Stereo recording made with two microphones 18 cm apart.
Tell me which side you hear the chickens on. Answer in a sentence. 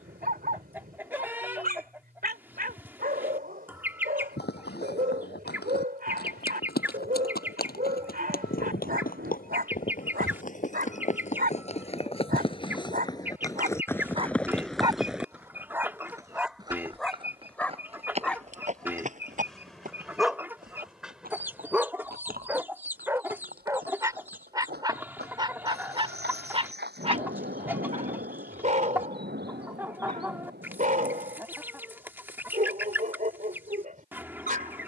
In this clip you hear the chickens in the centre.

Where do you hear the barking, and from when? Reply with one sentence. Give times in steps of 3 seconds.
In this clip you hear the barking on the right from 0 s, in the centre from 15 s and on the right from 24 s.